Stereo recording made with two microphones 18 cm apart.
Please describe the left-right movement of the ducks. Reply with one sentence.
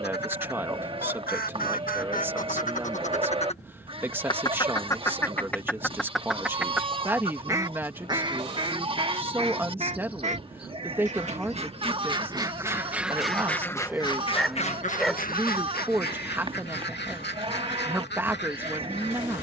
In this clip you hear the ducks move from left to right and back again.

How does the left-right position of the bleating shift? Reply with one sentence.
You can hear the bleating stay put.